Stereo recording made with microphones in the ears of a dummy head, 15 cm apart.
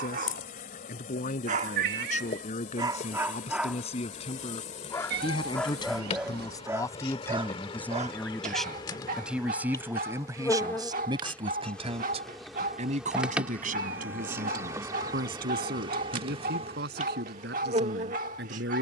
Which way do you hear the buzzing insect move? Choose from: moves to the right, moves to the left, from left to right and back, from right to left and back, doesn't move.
moves to the right.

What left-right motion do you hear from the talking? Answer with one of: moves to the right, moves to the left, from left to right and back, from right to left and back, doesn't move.
moves to the right.